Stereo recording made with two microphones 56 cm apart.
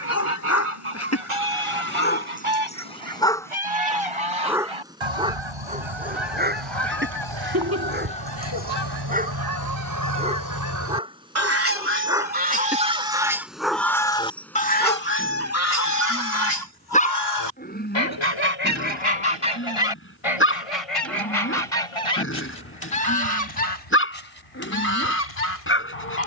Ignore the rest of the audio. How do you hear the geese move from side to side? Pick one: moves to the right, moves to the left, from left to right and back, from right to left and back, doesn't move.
moves to the left.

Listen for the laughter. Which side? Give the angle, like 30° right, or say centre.
30° right.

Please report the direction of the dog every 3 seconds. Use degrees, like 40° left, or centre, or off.
20° left, centre, 20° right, 10° right, centre, 10° left, 20° left, 20° left, 20° left.